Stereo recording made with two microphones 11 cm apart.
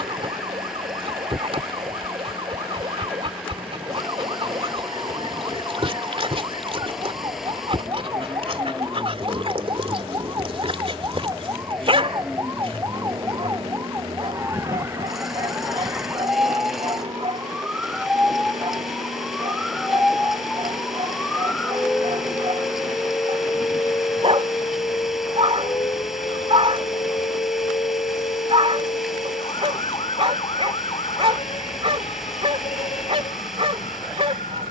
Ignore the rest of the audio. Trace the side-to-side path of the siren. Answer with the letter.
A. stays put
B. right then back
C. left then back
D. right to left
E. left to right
D.